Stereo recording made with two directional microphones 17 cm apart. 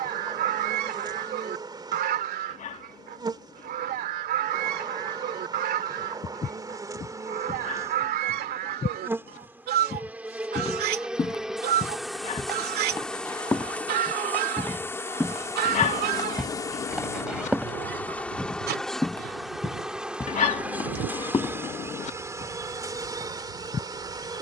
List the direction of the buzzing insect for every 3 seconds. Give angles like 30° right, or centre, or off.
20° right, 20° right, 20° right, 10° right, 10° left, 20° left, centre, 20° right.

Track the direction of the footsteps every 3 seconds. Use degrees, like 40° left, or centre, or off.
off, off, 30° left, 20° left, 10° left, centre, 10° left, 20° left.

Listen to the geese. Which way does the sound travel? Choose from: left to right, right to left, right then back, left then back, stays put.
stays put.